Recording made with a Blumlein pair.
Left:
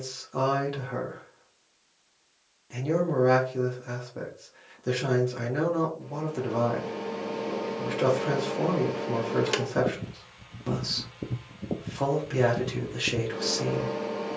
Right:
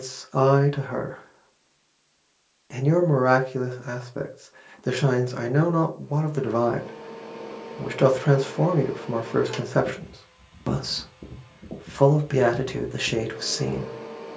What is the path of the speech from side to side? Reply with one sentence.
In this clip you hear the speech stay in one place.